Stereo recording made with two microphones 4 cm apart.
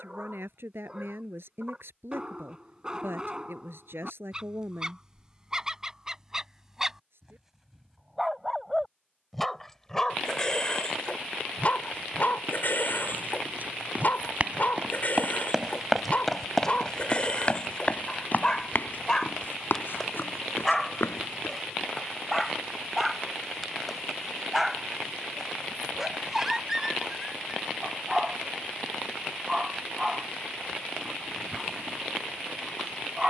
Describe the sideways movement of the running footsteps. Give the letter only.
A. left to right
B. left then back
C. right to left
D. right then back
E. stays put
C.